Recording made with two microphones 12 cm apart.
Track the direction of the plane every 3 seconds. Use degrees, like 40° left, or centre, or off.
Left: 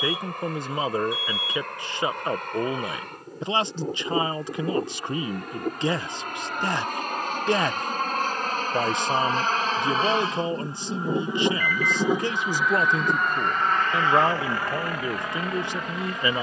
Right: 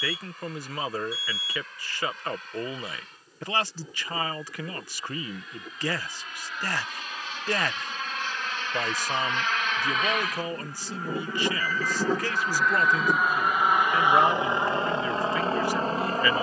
70° left, 60° left, 50° left, 30° left, 10° right, 30° right.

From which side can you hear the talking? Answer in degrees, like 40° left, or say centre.
20° left.